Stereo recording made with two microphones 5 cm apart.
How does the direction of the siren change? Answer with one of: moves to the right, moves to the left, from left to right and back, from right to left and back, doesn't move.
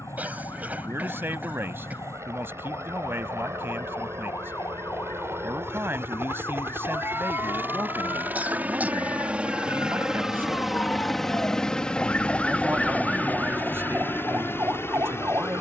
moves to the right.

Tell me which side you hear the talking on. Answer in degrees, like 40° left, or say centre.
50° right.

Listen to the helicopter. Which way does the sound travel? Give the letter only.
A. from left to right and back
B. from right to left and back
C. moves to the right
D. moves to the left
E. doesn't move
D.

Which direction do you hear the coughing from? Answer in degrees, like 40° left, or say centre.
30° right.